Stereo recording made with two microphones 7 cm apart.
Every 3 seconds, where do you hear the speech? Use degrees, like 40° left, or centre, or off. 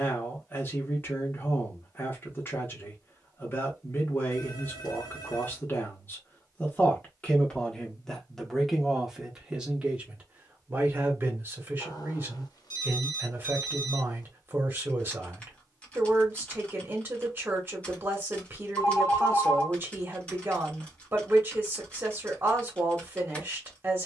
30° left, 30° left, 10° left, 20° right, 30° right, 30° right, 30° right, 30° right.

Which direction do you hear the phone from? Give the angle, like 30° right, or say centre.
60° left.